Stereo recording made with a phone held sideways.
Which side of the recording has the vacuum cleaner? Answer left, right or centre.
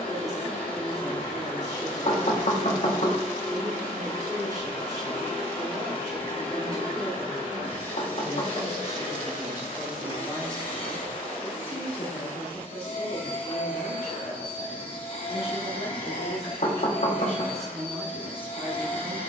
left.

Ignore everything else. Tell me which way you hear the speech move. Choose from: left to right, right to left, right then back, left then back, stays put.
left then back.